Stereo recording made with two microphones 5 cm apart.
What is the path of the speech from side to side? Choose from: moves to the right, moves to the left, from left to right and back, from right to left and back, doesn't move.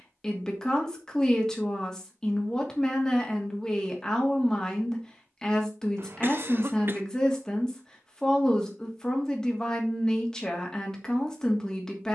doesn't move.